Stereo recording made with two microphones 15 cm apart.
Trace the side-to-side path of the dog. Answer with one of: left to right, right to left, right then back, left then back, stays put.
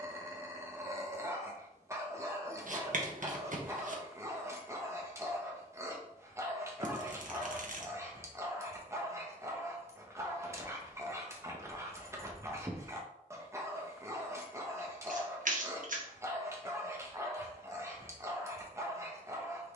stays put.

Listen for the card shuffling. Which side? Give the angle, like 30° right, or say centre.
60° right.